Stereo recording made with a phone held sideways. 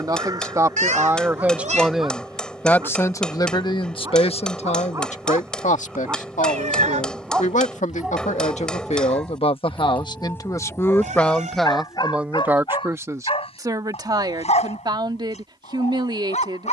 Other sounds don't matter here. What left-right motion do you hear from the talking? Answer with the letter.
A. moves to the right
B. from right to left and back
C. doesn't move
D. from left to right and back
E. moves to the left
B.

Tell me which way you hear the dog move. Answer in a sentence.
In this clip you hear the dog travel towards the left.